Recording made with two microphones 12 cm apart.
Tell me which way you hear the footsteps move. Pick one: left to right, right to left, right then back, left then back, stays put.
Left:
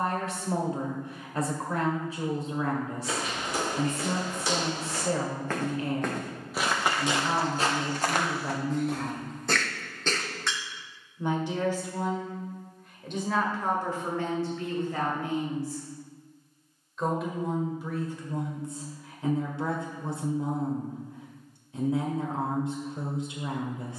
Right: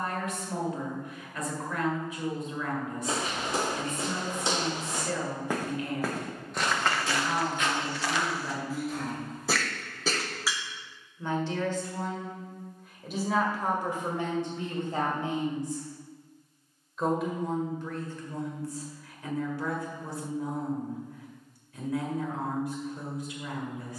right to left.